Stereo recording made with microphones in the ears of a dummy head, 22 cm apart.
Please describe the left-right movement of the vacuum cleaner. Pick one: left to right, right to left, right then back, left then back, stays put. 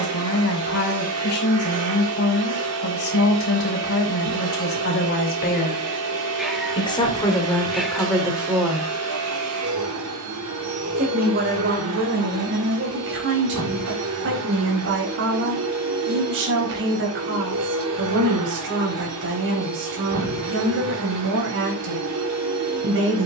stays put.